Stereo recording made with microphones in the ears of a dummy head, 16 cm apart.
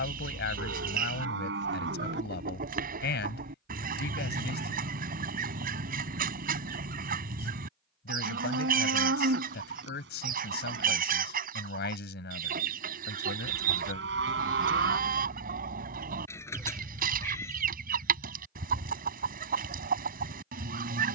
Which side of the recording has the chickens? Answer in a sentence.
You can hear the chickens on the right.